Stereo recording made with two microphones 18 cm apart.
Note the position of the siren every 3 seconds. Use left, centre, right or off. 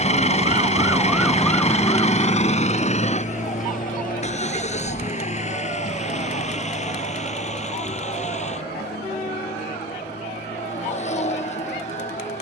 centre, left, left, left.